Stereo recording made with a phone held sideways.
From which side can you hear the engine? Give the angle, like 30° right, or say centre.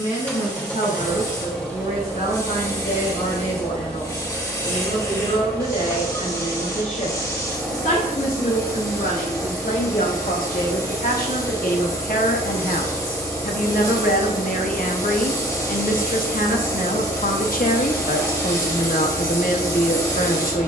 10° left.